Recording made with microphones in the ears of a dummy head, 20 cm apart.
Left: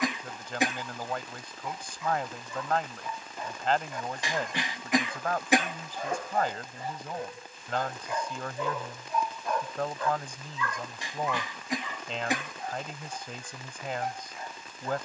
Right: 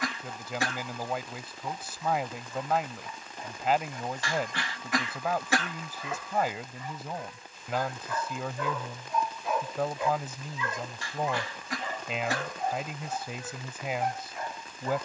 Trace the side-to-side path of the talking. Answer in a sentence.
You can hear the talking stay put.